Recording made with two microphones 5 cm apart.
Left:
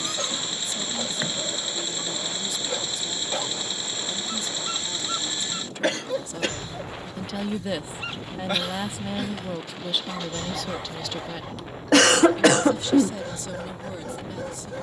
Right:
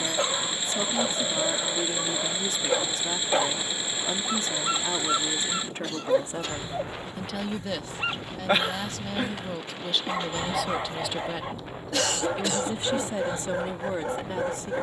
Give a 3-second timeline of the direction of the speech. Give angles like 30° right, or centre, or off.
40° right, 40° right, centre, centre, 30° right.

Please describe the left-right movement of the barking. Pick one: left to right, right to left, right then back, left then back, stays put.
stays put.